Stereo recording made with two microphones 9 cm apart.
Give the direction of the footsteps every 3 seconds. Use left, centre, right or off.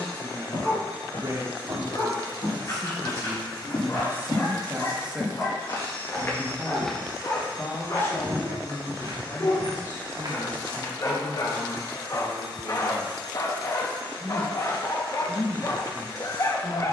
left, left, centre, right, off, off.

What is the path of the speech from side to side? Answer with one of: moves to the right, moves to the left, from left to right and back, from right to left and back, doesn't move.
moves to the left.